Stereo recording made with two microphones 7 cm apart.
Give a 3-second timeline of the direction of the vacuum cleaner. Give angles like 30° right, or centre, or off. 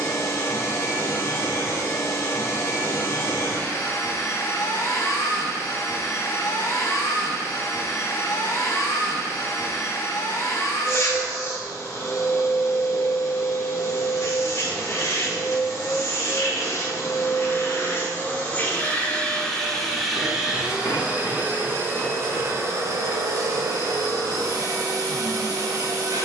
40° left, 40° left, 40° left, 40° left, 40° left, 40° left, 10° left, 40° right, 50° right.